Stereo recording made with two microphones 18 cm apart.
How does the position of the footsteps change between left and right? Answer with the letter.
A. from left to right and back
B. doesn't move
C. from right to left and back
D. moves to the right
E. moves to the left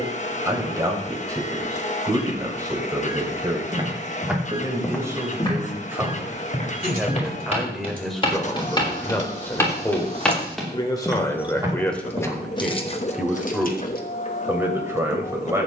C.